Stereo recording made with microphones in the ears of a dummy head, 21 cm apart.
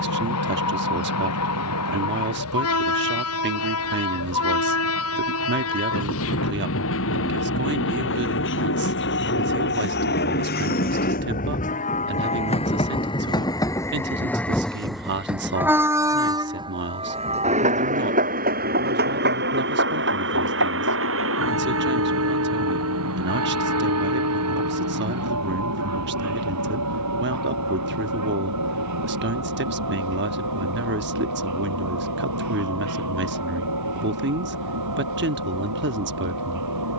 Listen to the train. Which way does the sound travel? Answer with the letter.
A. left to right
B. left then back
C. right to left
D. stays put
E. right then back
A.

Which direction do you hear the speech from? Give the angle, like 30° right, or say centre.
50° right.